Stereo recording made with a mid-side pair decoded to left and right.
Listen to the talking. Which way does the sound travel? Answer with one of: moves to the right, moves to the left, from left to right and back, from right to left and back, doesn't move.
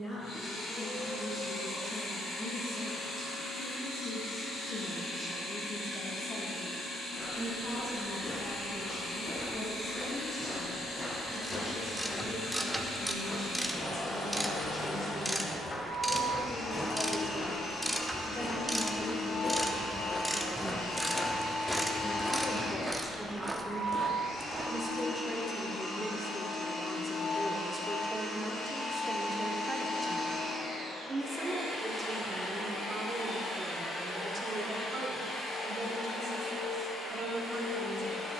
moves to the right.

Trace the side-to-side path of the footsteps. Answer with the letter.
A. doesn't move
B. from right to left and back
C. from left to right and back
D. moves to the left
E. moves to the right
E.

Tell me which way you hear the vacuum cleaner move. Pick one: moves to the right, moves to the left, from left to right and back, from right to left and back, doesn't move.
doesn't move.